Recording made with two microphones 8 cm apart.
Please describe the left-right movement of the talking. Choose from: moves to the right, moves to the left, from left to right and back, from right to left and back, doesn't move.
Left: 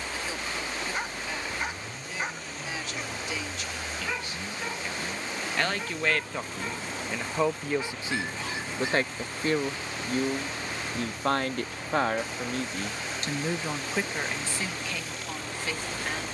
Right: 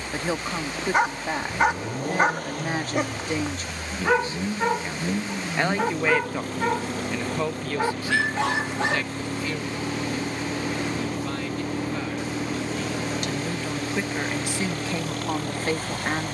from right to left and back.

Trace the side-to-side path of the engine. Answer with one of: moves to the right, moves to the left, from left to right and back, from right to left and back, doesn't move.
doesn't move.